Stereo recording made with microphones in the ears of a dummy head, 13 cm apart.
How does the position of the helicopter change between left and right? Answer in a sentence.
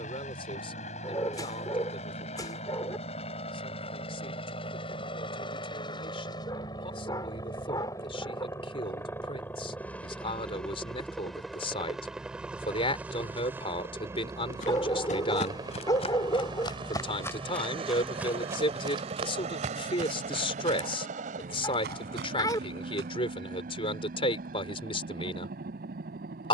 In this clip you hear the helicopter move from left to right.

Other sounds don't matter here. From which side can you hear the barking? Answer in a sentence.
In this clip you hear the barking on the left.